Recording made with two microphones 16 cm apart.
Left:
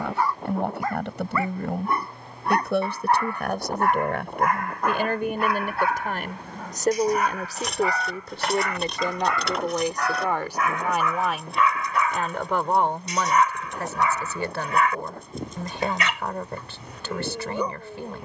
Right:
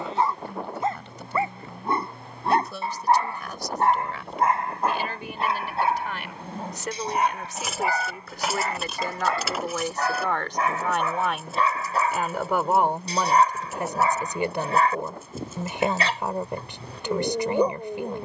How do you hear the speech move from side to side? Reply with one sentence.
You can hear the speech move from left to right.